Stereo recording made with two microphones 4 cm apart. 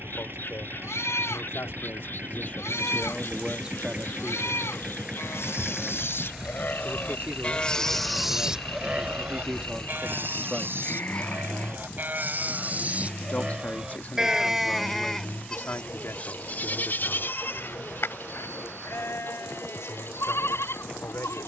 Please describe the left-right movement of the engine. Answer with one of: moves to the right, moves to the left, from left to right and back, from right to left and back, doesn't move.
moves to the left.